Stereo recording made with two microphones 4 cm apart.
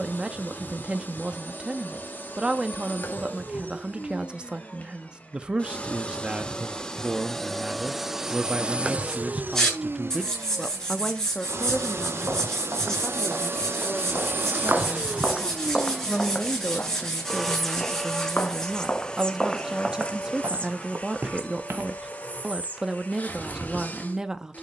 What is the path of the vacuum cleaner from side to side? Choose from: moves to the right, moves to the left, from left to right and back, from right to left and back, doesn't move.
from left to right and back.